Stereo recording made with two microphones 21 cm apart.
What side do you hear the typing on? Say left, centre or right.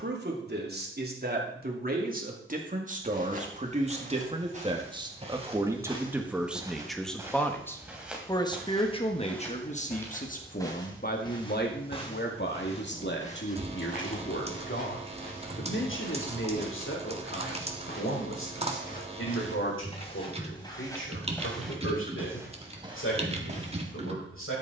right.